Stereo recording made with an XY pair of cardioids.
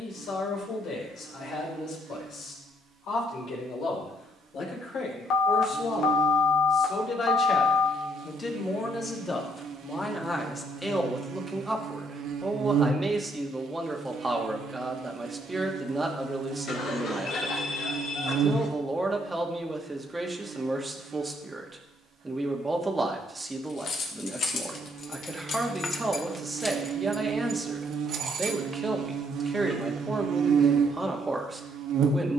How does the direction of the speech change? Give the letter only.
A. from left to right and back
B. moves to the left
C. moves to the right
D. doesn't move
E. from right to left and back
C.